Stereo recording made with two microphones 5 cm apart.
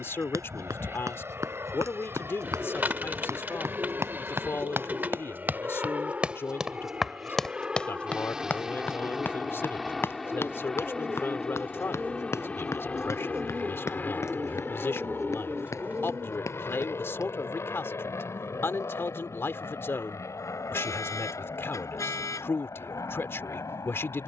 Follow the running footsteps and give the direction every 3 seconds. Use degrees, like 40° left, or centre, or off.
70° right, 40° right, 10° left, 50° left, 60° left, 70° left, off, off.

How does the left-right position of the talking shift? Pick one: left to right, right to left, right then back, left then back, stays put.
stays put.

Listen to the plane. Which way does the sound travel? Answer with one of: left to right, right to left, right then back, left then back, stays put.
right to left.